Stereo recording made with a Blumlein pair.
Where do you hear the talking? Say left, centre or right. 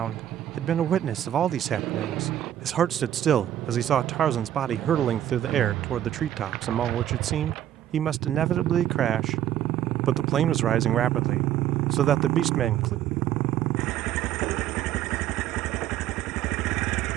right.